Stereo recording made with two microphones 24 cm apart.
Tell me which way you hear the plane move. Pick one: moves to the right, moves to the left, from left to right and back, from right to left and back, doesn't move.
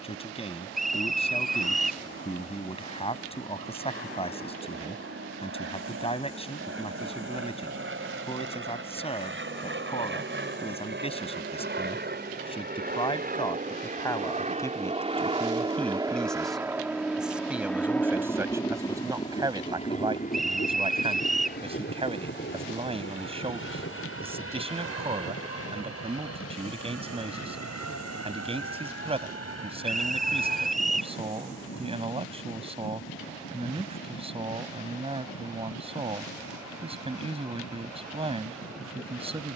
moves to the left.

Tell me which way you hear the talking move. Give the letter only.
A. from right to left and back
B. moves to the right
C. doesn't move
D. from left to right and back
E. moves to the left
B.